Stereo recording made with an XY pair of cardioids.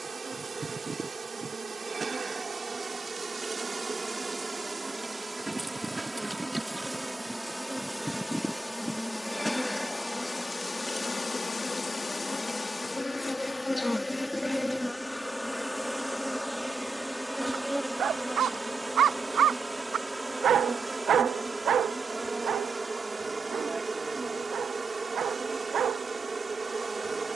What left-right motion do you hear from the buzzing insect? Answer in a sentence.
You can hear the buzzing insect go left and come back.